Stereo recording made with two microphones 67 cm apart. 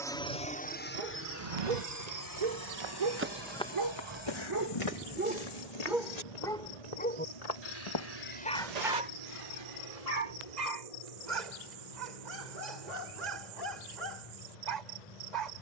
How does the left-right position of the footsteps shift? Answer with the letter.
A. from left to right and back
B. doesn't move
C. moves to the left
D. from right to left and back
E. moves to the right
D.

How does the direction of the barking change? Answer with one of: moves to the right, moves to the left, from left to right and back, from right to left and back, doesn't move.
from right to left and back.